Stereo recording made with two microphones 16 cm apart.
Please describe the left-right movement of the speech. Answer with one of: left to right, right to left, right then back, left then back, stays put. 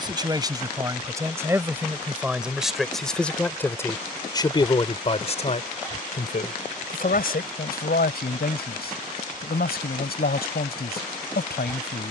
right to left.